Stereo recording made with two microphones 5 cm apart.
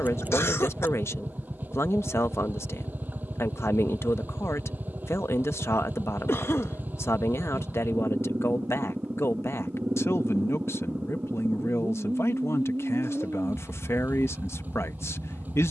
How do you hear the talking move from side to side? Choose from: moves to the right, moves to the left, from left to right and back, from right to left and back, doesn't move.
doesn't move.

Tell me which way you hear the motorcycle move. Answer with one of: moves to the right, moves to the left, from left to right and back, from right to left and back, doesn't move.
doesn't move.